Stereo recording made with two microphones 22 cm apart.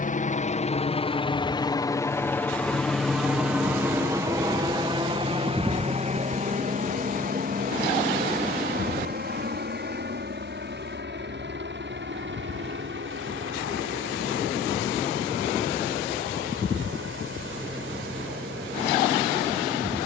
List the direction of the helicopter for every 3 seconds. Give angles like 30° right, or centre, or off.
20° left, 20° right, 40° right, 50° right, 60° right, 60° right, 60° right.